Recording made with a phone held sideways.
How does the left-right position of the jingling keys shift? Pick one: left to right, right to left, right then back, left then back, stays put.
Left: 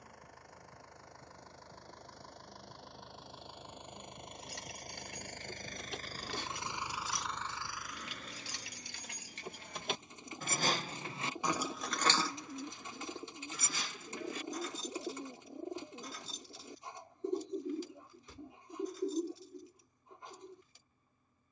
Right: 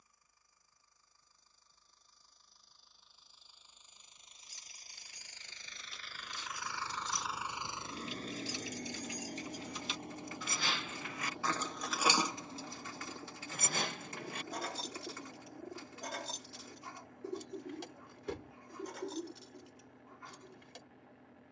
left to right.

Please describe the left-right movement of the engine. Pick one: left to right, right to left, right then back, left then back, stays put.
left to right.